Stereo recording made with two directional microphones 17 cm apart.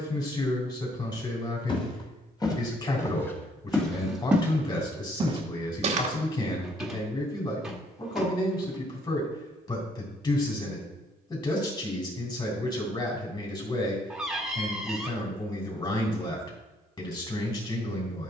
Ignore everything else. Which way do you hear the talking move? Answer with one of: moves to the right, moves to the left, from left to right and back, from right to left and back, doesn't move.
doesn't move.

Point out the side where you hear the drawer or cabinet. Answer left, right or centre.
centre.